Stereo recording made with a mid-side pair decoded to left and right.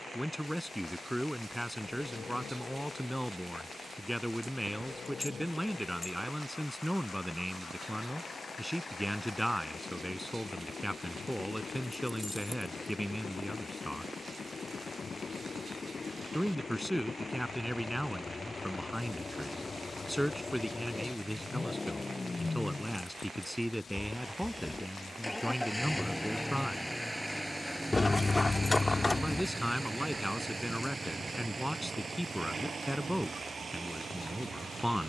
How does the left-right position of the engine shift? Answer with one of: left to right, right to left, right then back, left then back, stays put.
left to right.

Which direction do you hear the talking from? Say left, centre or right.
centre.